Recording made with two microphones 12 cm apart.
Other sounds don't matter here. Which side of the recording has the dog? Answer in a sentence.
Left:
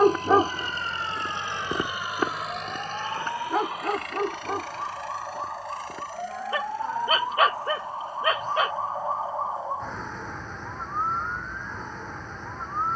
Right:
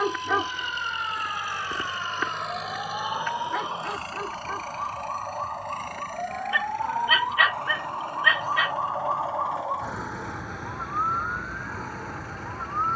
You can hear the dog on the left.